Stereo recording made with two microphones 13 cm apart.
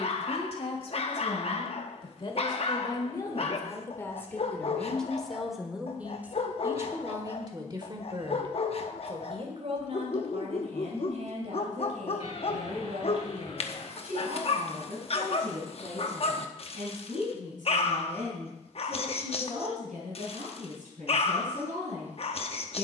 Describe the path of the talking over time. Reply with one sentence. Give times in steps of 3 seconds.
In this clip you hear the talking on the left from 0 s, in the centre from 3 s and on the right from 6 s.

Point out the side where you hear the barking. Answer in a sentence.
In this clip you hear the barking on the left.